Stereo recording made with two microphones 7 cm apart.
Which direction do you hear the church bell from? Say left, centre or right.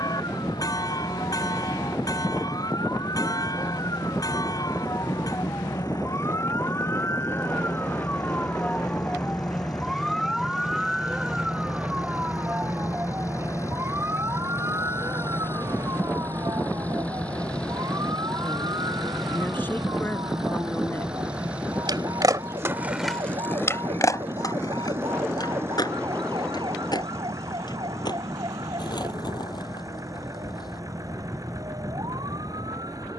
left.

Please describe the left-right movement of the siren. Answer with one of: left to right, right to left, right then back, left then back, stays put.
left to right.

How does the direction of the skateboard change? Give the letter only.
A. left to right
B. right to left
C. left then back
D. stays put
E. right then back
B.